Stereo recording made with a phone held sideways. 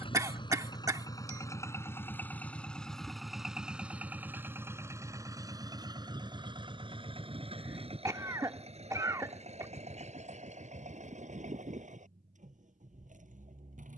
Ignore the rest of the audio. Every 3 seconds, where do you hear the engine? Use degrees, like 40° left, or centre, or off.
20° left, 10° right, 40° right, 50° right, 60° right.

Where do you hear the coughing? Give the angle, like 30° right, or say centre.
20° right.